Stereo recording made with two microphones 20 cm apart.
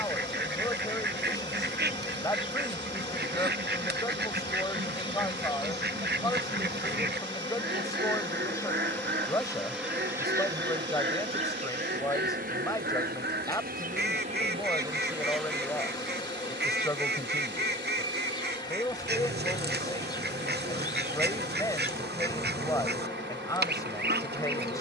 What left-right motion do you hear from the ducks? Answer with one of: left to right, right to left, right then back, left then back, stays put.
stays put.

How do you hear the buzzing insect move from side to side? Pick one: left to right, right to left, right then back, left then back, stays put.
right then back.